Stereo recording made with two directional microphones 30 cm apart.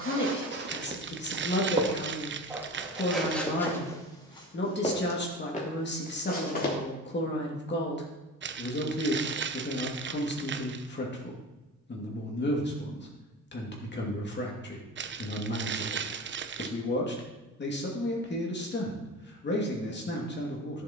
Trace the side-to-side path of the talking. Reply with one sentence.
In this clip you hear the talking stay put.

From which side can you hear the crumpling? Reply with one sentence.
In this clip you hear the crumpling on the right.